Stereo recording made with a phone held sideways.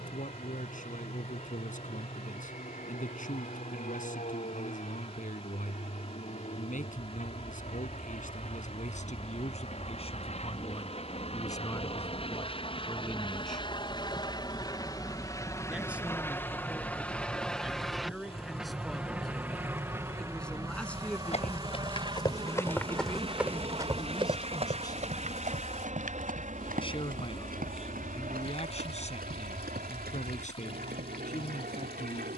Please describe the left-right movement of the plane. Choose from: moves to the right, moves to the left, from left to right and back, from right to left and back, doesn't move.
moves to the right.